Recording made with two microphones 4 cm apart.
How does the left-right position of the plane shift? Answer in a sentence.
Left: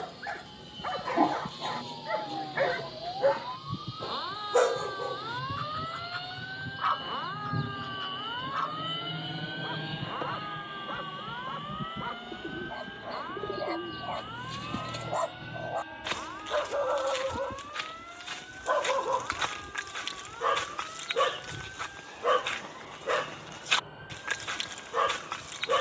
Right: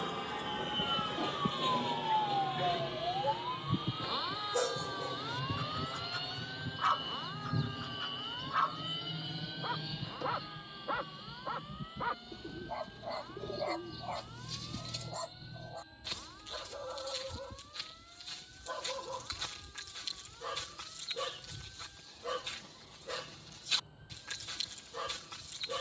You can hear the plane move to the left.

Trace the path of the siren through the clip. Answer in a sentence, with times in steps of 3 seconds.
In this clip you hear the siren on the right from 0 s, in the centre from 3 s and on the left from 6 s.